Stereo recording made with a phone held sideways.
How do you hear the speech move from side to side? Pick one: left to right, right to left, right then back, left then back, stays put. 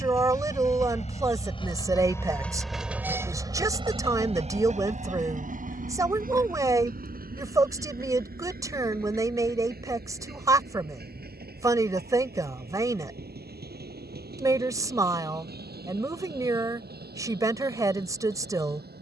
stays put.